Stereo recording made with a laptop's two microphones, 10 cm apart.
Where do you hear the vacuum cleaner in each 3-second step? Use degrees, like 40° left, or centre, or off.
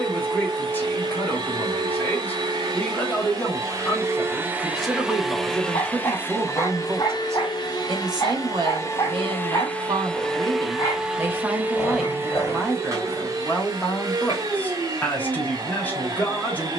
40° right, 20° right, 40° left, centre, 30° right, 40° right.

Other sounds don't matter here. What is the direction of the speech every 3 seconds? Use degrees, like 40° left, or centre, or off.
20° left, 10° left, 30° right, 40° right, 10° left, 20° left.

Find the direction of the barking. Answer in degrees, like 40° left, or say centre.
30° left.